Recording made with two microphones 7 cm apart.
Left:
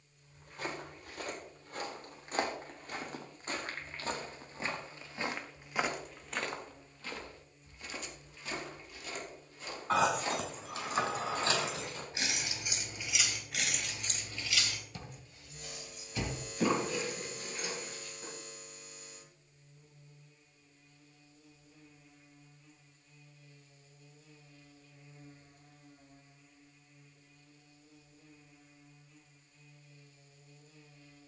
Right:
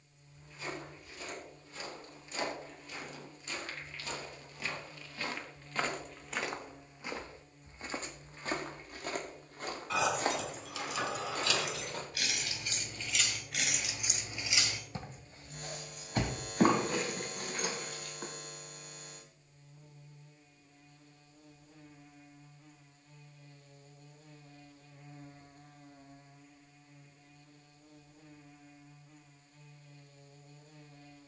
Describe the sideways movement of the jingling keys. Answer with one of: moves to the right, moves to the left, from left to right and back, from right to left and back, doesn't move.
moves to the right.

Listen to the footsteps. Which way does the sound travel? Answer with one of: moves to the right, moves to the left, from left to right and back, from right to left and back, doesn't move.
moves to the right.